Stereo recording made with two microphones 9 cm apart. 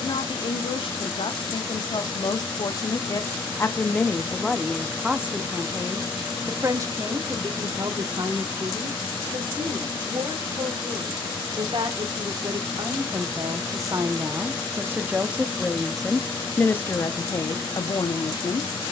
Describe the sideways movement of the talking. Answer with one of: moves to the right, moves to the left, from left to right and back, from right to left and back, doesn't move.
from left to right and back.